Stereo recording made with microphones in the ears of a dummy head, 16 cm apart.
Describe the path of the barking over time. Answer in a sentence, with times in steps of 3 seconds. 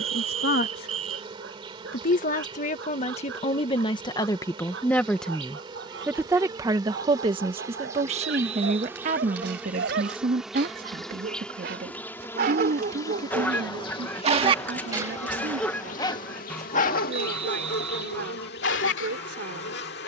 In this clip you hear the barking on the right from 0 s and on the left from 15 s.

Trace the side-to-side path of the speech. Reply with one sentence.
In this clip you hear the speech move to the right.